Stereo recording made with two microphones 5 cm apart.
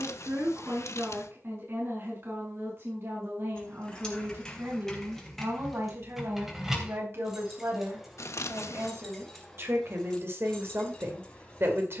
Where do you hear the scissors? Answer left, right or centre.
left.